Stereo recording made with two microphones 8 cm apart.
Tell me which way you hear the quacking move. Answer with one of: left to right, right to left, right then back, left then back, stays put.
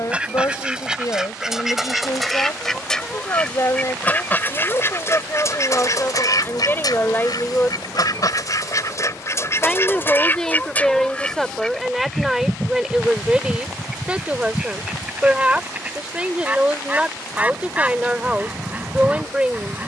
left then back.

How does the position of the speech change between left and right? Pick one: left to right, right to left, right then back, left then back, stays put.
left to right.